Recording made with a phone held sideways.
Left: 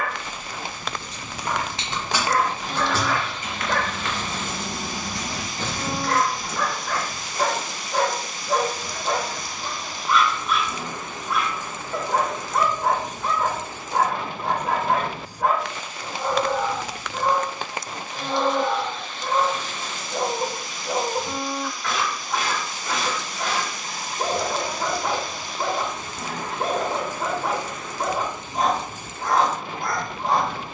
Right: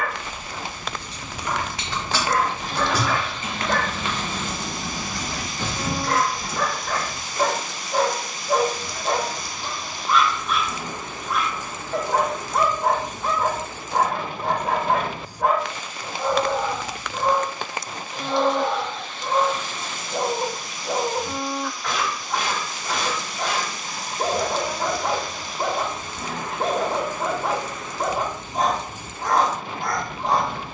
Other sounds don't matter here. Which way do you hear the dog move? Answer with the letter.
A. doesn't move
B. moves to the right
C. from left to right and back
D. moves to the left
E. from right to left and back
A.